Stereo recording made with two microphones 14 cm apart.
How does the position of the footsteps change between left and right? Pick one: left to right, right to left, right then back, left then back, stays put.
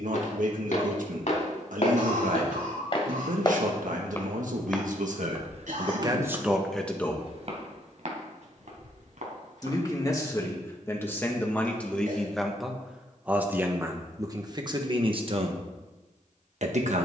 left to right.